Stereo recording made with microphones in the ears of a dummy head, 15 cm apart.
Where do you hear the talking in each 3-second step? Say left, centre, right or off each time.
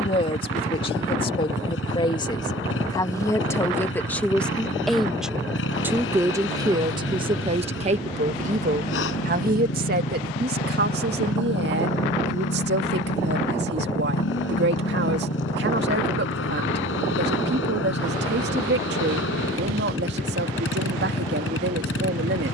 left, centre, right, right, right, right, right, right.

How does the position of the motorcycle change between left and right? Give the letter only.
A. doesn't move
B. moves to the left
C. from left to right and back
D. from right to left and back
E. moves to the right
A.